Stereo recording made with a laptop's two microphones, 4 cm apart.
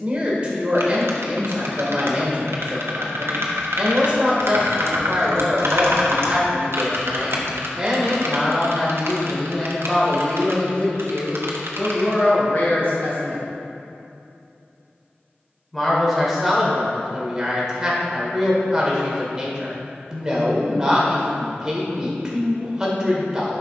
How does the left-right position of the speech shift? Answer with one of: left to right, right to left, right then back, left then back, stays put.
left then back.